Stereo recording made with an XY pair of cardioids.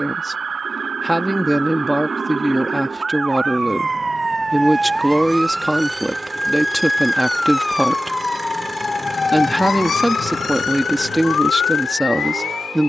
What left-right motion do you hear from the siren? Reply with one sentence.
In this clip you hear the siren travel towards the left.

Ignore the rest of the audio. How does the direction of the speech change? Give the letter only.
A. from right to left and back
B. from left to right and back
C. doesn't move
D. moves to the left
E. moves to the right
C.